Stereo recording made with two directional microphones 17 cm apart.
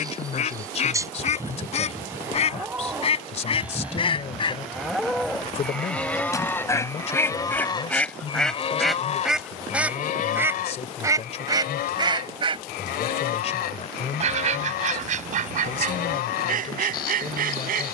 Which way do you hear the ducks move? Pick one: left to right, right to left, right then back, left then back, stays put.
left to right.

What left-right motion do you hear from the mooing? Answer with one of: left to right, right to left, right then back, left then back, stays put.
right to left.